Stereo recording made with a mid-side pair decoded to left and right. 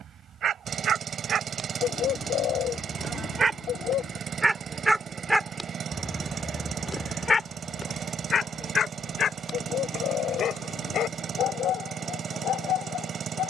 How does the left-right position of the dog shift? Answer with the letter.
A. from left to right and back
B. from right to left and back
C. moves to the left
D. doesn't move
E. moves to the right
C.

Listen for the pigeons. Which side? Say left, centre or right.
left.